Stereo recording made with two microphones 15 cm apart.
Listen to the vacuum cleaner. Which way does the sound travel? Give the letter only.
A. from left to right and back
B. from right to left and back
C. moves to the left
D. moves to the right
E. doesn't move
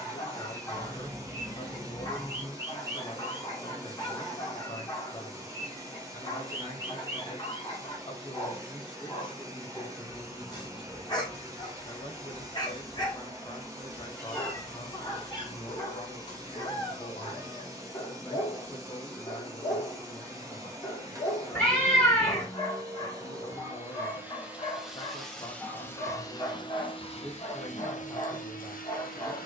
C.